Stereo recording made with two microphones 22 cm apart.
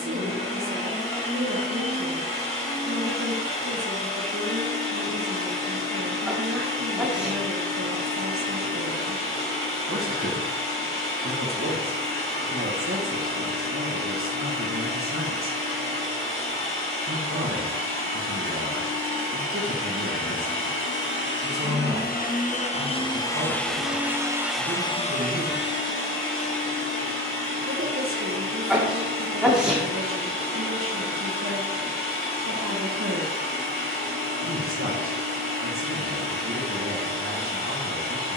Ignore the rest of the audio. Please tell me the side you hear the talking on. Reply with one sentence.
In this clip you hear the talking on the right.